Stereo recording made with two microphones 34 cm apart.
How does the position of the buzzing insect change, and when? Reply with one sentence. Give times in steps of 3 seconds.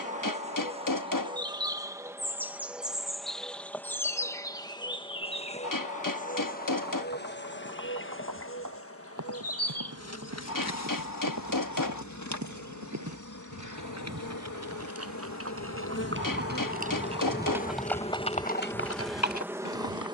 In this clip you hear the buzzing insect in the centre from 0 s, on the left from 6 s and in the centre from 18 s.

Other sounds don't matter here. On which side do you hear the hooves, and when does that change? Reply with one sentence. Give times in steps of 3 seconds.
In this clip you hear the hooves not at all from 0 s, on the right from 6 s and on the left from 18 s.